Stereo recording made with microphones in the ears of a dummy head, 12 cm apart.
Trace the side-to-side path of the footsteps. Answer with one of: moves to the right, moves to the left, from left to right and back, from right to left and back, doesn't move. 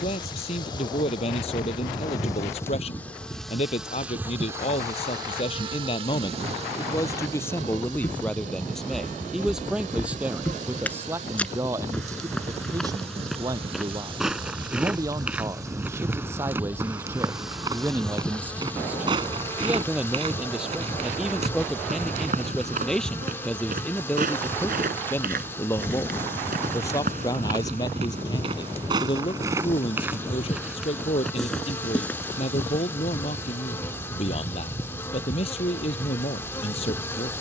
from left to right and back.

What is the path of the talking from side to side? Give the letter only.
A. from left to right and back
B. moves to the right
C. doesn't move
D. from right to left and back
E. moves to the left
A.